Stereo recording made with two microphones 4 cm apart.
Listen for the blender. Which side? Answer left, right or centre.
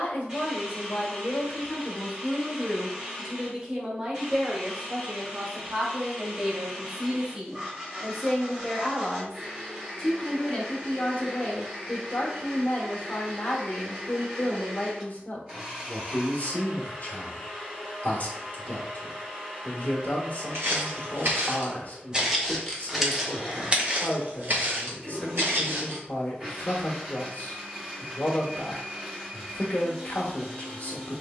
right.